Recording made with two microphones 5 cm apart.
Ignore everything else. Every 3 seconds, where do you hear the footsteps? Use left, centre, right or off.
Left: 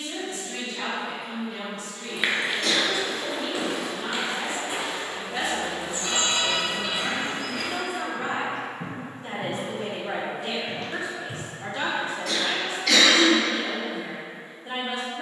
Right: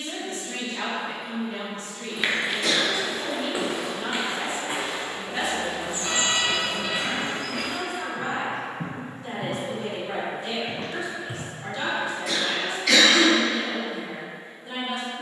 centre, right, right, right, off.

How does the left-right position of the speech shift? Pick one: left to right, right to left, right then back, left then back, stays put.
right to left.